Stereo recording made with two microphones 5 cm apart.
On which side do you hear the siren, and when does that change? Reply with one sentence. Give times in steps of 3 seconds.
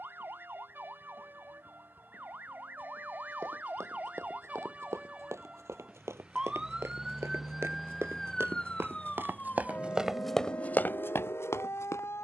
In this clip you hear the siren on the right from 0 s, in the centre from 6 s and on the left from 9 s.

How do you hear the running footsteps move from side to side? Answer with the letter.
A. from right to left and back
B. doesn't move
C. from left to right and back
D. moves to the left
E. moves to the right
D.